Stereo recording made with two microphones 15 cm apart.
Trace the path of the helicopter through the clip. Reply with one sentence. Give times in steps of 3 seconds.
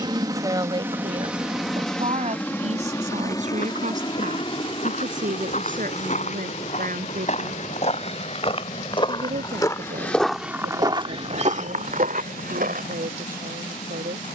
In this clip you hear the helicopter in the centre from 0 s and on the left from 3 s.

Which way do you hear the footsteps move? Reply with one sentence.
In this clip you hear the footsteps travel towards the right.